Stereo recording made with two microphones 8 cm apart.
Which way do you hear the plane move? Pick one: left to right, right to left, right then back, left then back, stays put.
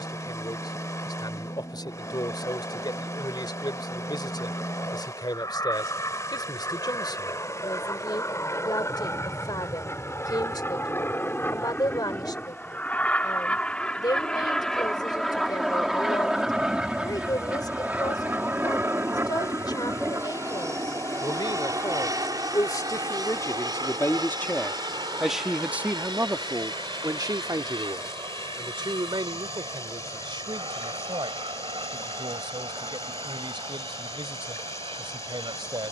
left to right.